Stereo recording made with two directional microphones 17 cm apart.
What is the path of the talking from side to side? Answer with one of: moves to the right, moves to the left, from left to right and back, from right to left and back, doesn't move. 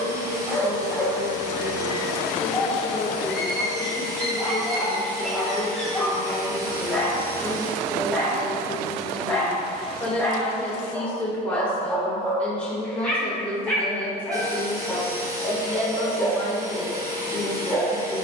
doesn't move.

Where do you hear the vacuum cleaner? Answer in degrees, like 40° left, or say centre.
20° right.